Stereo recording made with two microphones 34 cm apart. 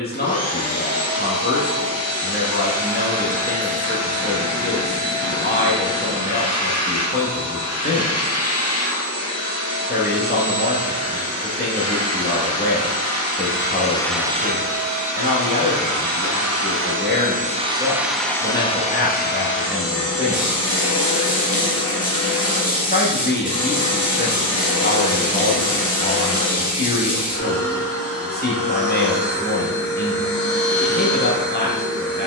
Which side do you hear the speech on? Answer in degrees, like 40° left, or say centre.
30° left.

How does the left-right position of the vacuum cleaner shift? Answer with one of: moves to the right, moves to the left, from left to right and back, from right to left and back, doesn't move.
from left to right and back.